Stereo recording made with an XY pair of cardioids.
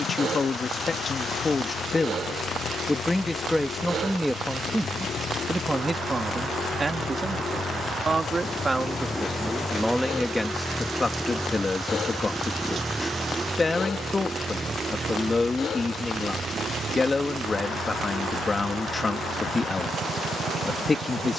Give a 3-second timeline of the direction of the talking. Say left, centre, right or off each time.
left, centre, right, centre, left, left, left.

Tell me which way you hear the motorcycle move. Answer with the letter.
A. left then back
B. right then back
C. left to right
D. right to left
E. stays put
C.